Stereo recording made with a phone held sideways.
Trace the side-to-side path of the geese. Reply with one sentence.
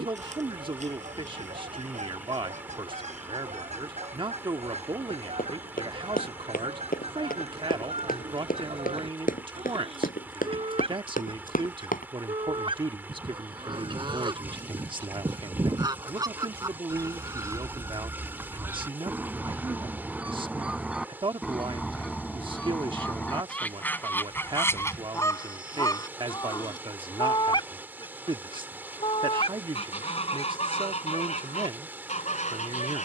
You can hear the geese move to the left.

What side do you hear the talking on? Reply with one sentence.
In this clip you hear the talking on the right.